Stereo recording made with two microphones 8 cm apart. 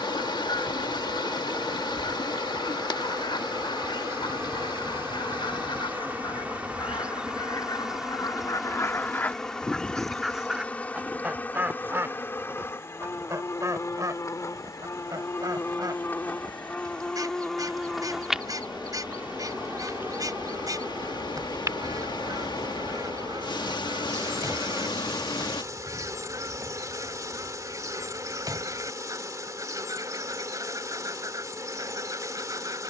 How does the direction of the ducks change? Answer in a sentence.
In this clip you hear the ducks move from left to right.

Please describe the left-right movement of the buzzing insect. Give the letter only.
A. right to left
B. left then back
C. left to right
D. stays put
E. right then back
B.